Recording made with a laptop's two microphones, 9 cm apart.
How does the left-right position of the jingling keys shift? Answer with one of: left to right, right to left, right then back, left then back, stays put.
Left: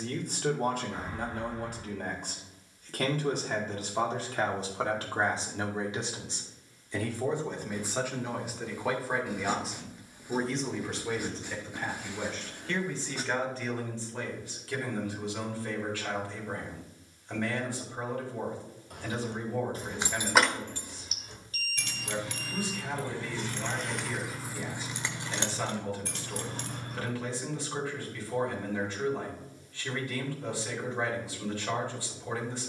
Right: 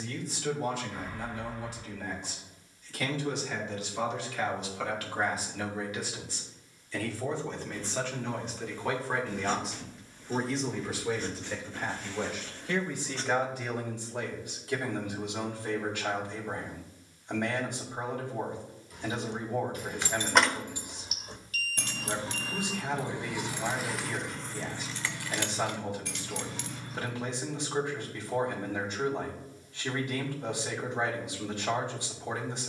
right then back.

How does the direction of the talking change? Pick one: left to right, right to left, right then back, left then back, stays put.
left to right.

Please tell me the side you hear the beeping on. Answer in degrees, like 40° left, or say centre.
30° left.